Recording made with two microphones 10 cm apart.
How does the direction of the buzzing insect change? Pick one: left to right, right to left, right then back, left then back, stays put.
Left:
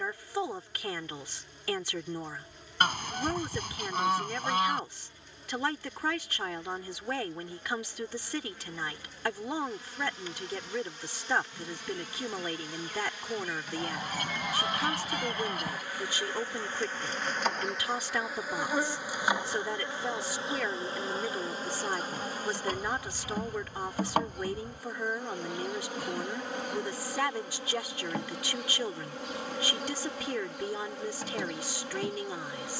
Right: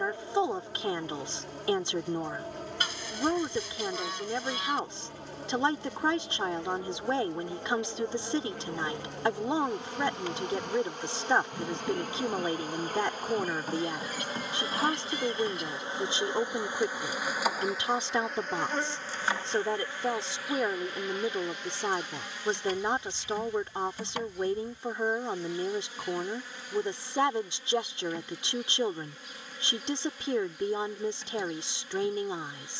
right to left.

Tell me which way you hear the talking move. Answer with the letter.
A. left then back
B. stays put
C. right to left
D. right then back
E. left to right
B.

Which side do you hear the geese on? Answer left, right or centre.
left.